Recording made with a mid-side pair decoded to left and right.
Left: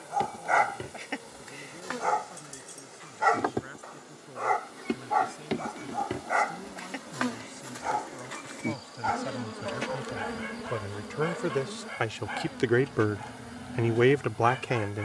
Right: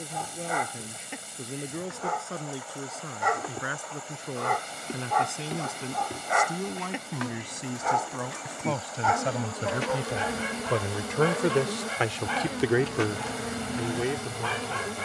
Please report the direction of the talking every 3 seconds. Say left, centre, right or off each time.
right, right, right, right, left.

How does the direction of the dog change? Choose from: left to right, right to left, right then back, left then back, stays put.
left to right.